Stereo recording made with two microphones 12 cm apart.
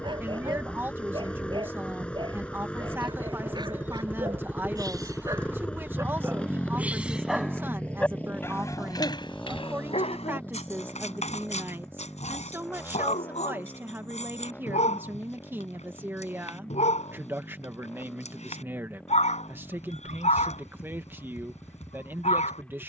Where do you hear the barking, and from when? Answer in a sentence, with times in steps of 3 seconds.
In this clip you hear the barking on the right from 0 s, in the centre from 6 s and on the left from 9 s.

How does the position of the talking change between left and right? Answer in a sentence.
You can hear the talking stay put.